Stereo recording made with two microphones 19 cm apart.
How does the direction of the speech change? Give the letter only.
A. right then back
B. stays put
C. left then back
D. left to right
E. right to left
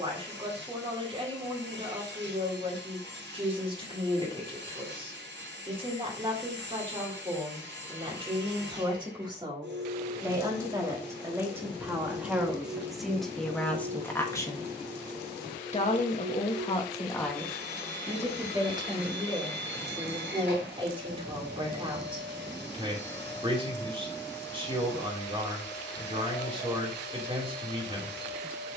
C.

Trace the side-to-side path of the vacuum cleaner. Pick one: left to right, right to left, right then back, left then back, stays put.
stays put.